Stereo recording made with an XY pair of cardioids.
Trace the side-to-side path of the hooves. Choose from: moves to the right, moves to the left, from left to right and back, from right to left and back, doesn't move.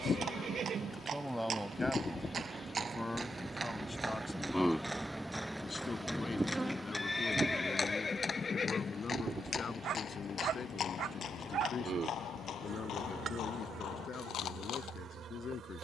moves to the left.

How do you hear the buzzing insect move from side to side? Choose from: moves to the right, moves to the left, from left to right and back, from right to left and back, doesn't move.
moves to the right.